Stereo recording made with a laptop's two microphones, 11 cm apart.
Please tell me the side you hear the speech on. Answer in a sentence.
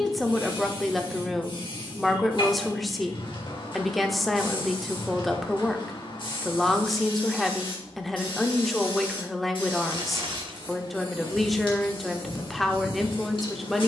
In this clip you hear the speech in the centre.